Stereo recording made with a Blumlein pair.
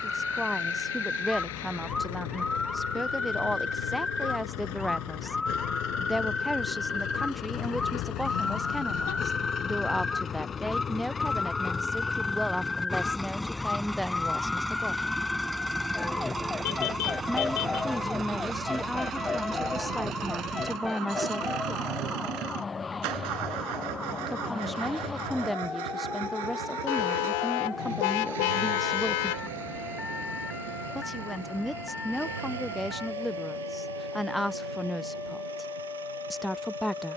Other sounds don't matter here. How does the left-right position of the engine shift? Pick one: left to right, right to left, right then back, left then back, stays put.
left to right.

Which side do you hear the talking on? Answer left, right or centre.
centre.